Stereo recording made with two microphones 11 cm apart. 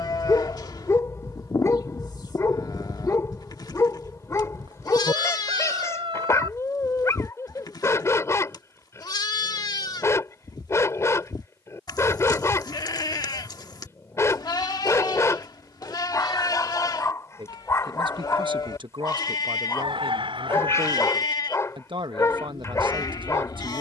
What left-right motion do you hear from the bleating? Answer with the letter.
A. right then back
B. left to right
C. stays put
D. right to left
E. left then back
C.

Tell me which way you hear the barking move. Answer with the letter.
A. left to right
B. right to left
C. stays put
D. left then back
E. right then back
C.